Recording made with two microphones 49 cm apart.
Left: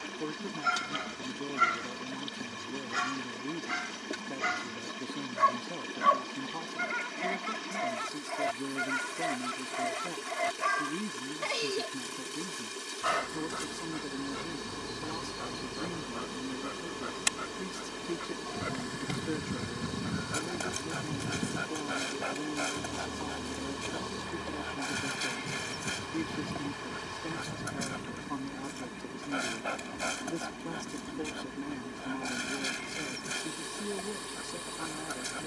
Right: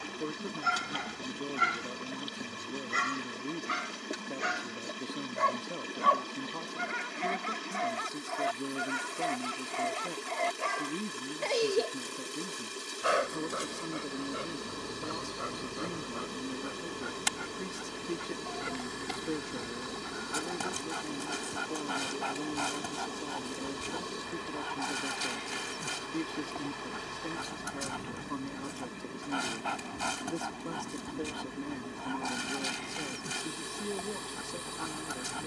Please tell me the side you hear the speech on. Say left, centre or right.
centre.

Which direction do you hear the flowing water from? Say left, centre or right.
centre.